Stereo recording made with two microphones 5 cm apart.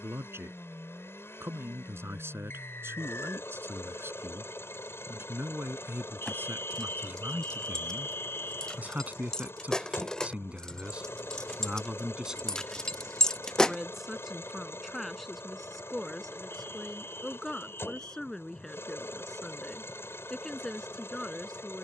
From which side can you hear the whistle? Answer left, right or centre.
left.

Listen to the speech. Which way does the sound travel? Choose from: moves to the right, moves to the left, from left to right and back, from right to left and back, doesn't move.
moves to the left.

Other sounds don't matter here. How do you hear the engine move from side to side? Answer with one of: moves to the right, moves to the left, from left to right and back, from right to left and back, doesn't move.
doesn't move.